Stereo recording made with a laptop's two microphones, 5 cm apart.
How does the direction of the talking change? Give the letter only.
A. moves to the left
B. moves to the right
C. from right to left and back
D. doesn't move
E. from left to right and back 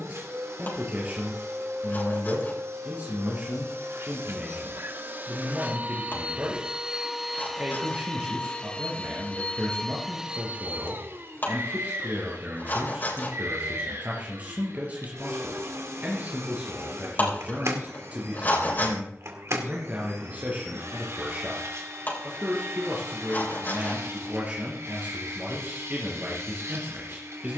D.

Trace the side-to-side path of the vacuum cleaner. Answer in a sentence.
In this clip you hear the vacuum cleaner move from right to left and back again.